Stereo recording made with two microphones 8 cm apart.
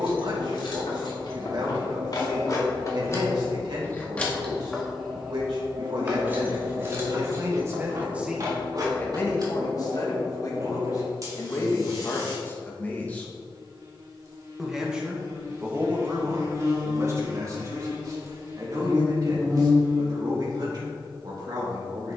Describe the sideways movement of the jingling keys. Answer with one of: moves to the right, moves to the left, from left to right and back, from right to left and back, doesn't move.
moves to the right.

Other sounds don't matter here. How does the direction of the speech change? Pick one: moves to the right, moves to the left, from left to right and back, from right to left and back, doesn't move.
from right to left and back.